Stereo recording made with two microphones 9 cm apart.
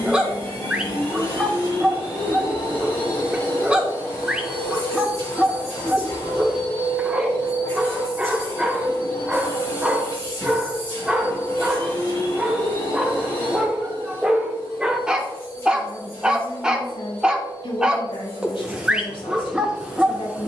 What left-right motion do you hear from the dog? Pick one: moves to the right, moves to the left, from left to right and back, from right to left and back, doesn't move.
doesn't move.